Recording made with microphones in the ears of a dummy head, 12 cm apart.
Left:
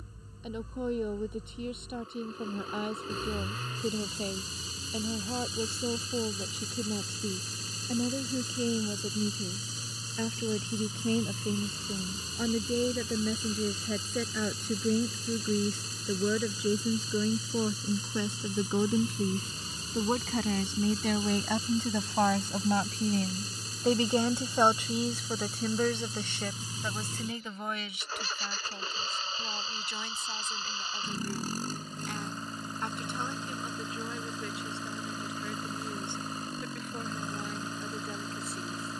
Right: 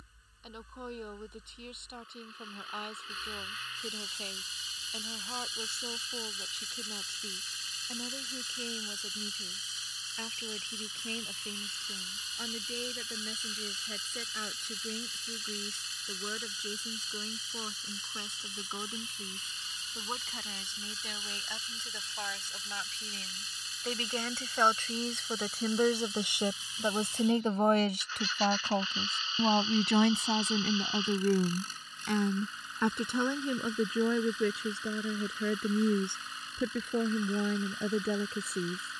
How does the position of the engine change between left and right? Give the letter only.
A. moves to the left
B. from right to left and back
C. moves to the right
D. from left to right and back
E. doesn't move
E.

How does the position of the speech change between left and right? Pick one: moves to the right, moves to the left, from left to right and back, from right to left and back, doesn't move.
moves to the right.